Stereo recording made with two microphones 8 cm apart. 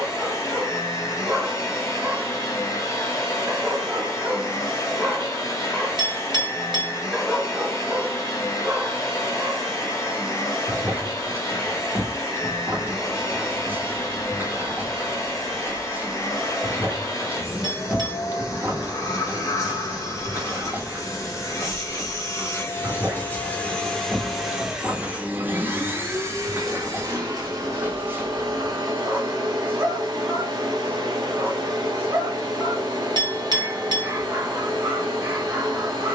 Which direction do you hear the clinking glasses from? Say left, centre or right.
right.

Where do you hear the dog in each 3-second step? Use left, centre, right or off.
right, centre, centre, right, right, right, right, right, right, right, right, right.